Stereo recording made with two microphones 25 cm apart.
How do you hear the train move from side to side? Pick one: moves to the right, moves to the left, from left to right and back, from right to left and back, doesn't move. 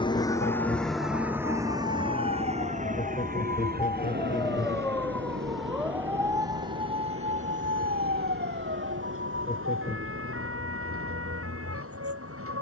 moves to the right.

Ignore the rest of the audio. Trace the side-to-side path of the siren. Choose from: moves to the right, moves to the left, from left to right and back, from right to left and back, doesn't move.
moves to the right.